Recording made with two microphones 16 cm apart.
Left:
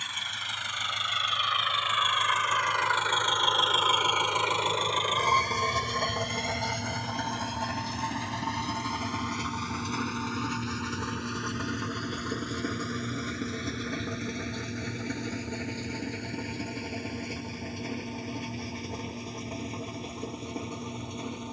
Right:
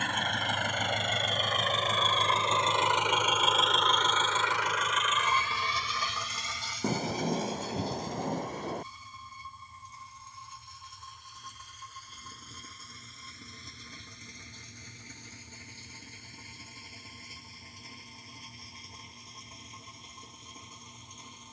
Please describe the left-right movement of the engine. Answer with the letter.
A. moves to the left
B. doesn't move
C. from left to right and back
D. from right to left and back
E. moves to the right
A.